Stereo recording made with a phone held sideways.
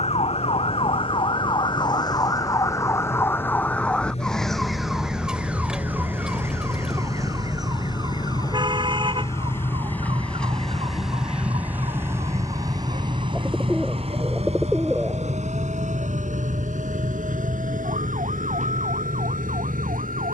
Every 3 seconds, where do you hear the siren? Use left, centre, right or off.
left, centre, right, right, right, right, right.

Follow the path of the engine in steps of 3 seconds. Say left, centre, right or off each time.
left, left, left, centre, right, right, right.